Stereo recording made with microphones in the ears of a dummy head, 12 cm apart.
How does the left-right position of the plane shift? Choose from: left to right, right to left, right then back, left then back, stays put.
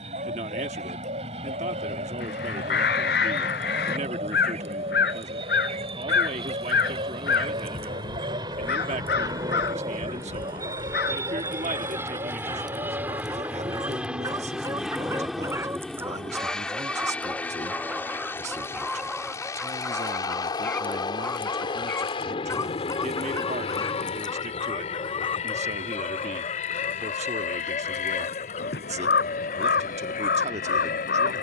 right to left.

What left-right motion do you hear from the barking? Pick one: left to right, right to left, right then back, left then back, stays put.
right to left.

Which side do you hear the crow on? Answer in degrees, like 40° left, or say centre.
80° left.